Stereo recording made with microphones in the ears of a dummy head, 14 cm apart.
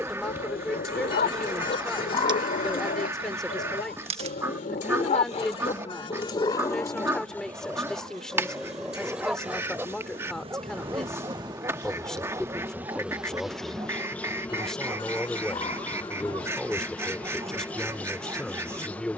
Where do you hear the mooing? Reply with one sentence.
You can hear the mooing on the left.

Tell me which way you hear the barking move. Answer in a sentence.
You can hear the barking move to the right.